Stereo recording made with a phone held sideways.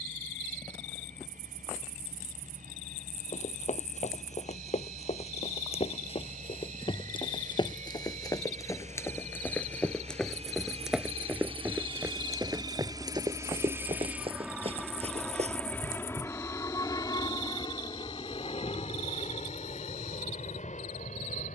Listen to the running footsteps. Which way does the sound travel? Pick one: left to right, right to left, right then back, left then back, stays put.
left to right.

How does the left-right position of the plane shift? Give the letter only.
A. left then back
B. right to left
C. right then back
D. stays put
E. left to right
B.